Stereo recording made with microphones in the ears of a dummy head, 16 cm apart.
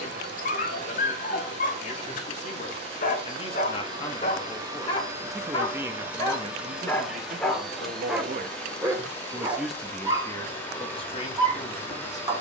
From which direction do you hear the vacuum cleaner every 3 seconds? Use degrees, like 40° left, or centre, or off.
40° right, 20° right, centre, 10° left.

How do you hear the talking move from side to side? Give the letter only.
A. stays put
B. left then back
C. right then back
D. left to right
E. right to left
C.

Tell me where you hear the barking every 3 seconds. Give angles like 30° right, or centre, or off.
50° left, 40° left, centre, 20° right.